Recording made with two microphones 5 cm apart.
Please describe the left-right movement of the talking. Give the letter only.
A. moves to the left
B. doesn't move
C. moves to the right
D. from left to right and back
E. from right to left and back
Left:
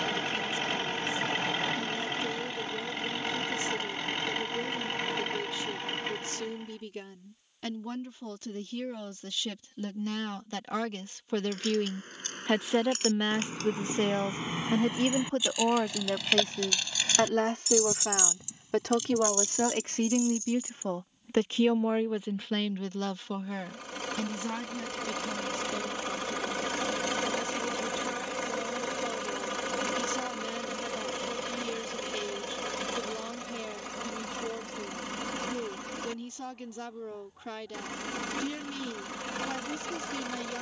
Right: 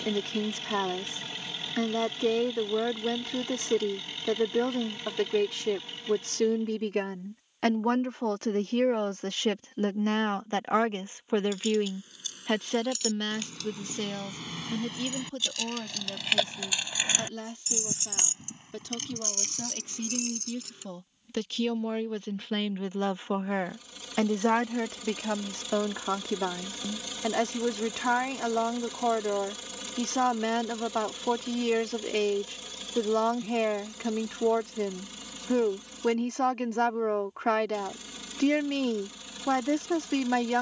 E.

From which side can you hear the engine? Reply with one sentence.
In this clip you hear the engine on the left.